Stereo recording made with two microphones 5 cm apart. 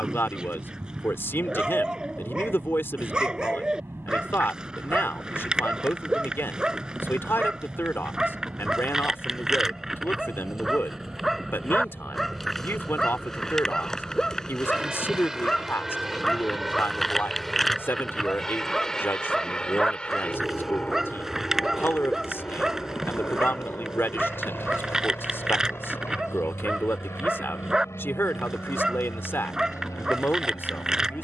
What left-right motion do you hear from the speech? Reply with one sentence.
You can hear the speech stay put.